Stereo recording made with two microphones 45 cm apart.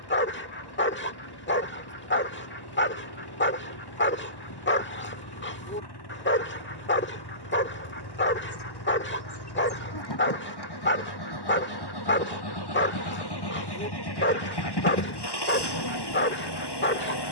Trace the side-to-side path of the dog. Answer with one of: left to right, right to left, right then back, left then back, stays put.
stays put.